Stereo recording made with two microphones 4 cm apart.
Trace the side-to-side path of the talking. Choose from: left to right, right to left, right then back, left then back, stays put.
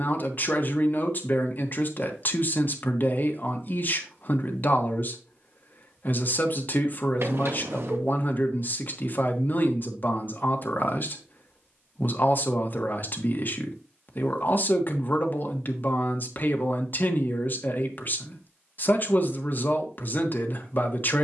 stays put.